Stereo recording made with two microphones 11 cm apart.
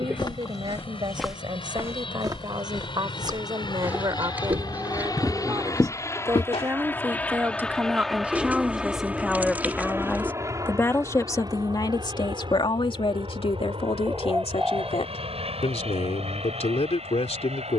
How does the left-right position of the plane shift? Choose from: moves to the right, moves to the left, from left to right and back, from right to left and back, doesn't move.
moves to the right.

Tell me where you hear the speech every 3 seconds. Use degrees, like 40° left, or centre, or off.
50° right, 40° right, 20° right, 20° left, 60° left, 80° left.